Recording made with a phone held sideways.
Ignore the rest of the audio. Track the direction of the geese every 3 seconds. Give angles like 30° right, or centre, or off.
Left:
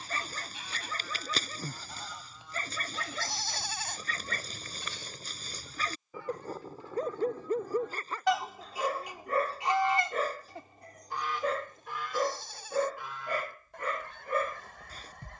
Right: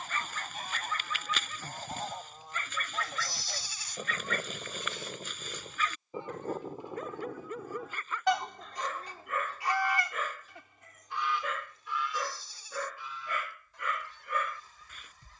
50° right, 40° right, 10° right, 40° left, 70° left.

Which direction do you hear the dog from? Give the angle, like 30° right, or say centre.
40° left.